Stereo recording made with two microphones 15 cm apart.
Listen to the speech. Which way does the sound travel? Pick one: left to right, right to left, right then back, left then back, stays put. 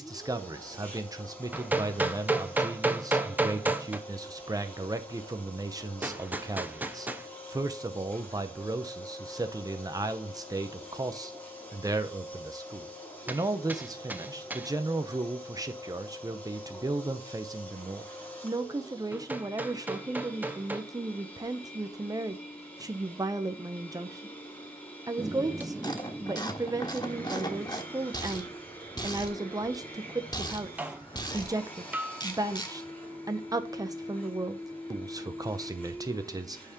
stays put.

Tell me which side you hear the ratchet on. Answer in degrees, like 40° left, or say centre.
30° left.